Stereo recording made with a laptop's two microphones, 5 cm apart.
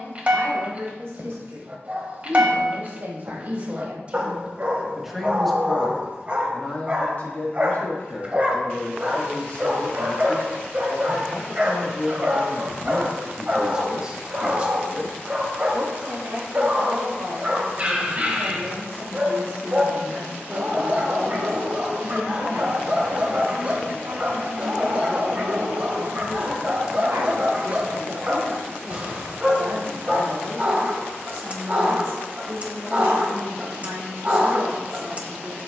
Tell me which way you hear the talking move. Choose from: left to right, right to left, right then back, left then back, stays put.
left then back.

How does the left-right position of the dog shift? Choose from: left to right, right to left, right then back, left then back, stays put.
stays put.